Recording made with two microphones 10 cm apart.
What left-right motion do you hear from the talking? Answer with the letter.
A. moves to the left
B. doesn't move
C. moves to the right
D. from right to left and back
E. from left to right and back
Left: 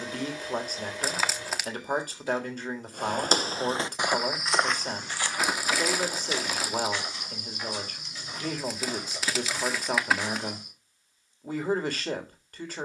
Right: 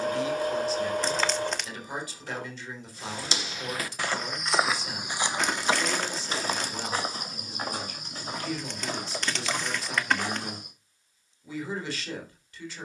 B.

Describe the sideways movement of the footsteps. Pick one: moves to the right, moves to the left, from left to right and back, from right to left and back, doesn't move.
moves to the right.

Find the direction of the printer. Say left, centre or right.
right.